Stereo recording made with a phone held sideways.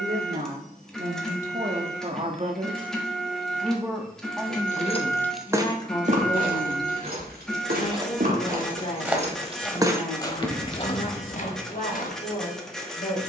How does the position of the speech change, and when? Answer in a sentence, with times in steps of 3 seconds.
In this clip you hear the speech on the right from 0 s, in the centre from 3 s and on the left from 6 s.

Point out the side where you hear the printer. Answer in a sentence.
In this clip you hear the printer in the centre.